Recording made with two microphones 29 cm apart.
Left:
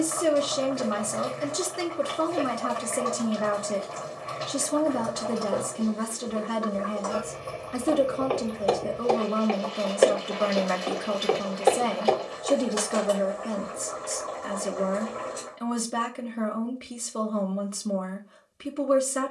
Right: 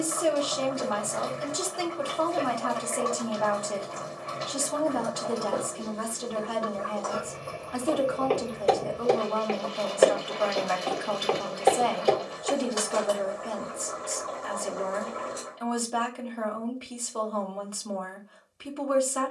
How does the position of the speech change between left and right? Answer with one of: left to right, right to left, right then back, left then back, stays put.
stays put.